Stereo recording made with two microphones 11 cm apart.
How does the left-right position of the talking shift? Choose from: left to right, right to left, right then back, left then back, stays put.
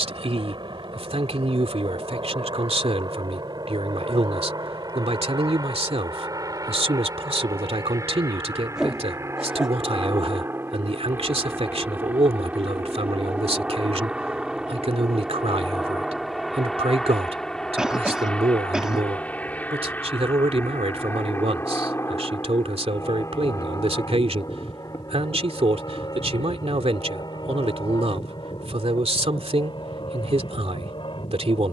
stays put.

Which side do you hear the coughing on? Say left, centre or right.
centre.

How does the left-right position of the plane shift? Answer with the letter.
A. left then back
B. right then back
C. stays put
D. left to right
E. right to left
E.